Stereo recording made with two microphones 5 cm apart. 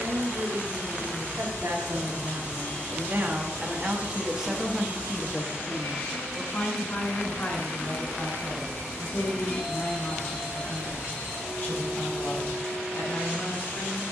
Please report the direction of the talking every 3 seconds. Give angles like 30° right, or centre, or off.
60° right, 10° right, 50° left, 60° left, 70° left.